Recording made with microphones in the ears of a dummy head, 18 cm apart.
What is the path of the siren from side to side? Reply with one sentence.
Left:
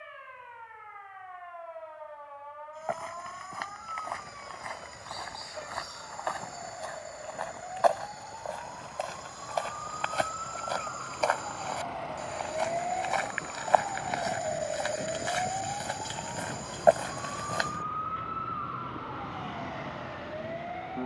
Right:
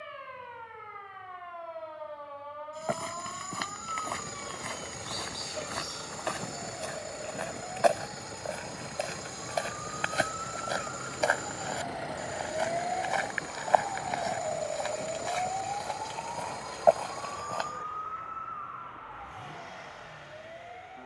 In this clip you hear the siren go from the right side to the left.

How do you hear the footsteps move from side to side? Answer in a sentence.
You can hear the footsteps travel towards the left.